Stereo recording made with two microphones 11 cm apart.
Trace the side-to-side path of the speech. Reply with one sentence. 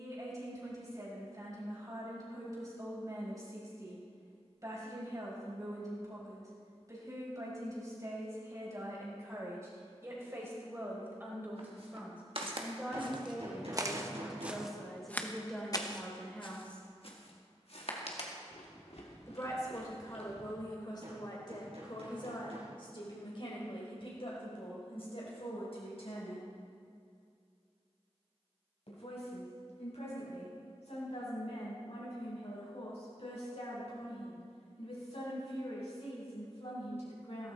You can hear the speech go from the right side to the left.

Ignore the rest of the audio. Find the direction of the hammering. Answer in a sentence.
You can hear the hammering on the right.